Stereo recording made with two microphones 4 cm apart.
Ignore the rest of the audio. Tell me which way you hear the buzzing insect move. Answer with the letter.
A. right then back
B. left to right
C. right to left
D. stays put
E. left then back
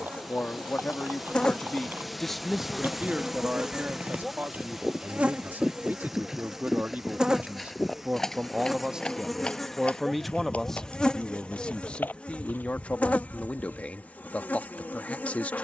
A.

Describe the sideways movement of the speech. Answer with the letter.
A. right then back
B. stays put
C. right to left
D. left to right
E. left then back
A.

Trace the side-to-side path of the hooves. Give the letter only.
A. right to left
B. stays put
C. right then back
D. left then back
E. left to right
A.